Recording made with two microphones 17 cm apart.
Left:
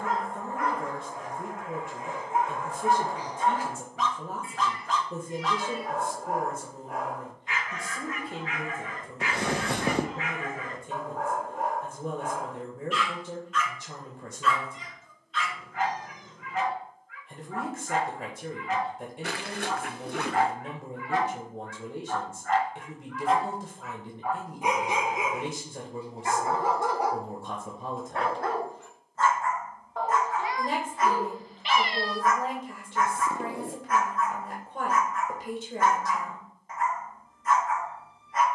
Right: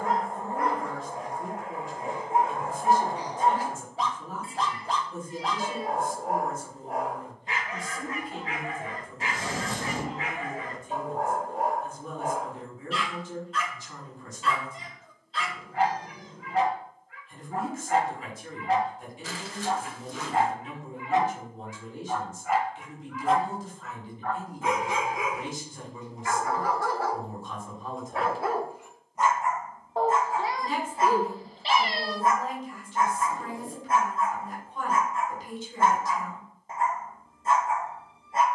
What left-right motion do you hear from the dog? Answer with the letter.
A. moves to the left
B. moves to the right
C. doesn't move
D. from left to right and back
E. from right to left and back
E.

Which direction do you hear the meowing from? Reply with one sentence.
In this clip you hear the meowing on the right.